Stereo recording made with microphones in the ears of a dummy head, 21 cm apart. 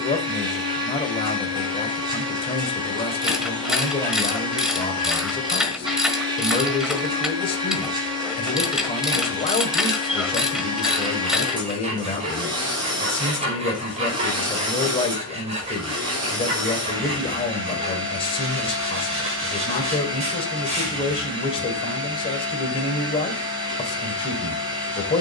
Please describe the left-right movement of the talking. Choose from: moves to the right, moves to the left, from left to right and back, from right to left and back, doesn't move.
doesn't move.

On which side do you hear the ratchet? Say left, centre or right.
centre.